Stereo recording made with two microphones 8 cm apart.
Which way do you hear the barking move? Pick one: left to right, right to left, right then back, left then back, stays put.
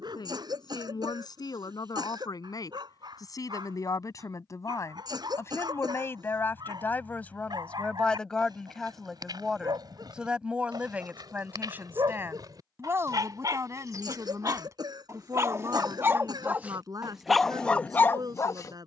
right to left.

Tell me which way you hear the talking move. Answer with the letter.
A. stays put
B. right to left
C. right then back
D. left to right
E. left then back
D.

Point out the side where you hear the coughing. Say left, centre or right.
right.